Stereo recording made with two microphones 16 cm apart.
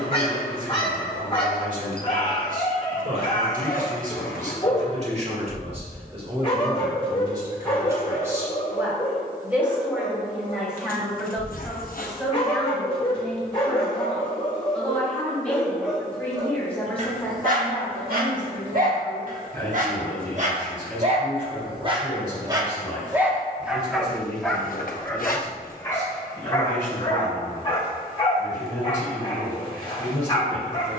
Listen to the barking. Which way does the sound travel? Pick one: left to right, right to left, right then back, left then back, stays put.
right then back.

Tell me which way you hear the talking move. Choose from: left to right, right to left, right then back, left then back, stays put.
right to left.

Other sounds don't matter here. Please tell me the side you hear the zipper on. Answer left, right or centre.
left.